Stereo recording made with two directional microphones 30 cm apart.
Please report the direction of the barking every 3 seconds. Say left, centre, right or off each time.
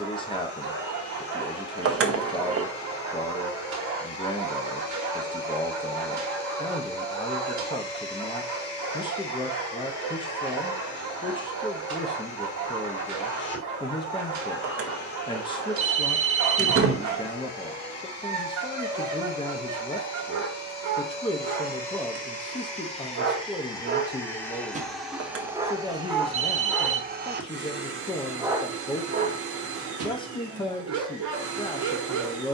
right, right, right, right, right, right, right, right, centre, right, right.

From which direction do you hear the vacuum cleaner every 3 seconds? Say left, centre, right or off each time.
left, left, left, left, left, left, left, left, centre, right, right.